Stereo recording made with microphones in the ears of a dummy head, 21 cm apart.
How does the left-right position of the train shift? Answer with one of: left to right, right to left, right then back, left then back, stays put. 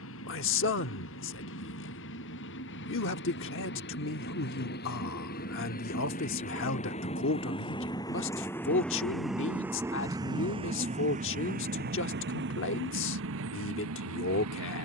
left to right.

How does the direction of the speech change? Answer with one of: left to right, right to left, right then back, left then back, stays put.
stays put.